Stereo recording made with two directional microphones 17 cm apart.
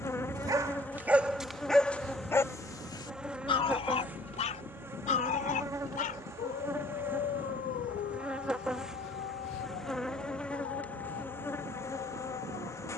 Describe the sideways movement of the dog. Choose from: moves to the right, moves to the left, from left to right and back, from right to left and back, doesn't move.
moves to the left.